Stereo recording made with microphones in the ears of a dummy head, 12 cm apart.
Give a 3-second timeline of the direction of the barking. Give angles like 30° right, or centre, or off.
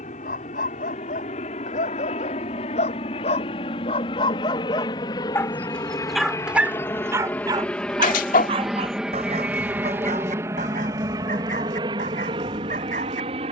60° left, 30° left, 20° right, 60° right, 60° right.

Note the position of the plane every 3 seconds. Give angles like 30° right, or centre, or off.
50° left, 40° left, 10° left, 20° right, 40° right.